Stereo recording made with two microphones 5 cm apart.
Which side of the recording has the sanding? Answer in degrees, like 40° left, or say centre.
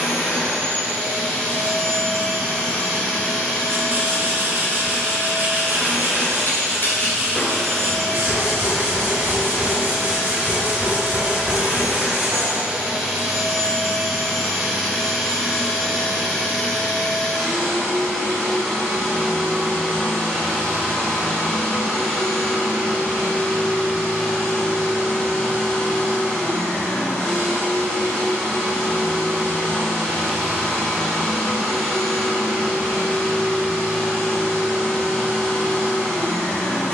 50° right.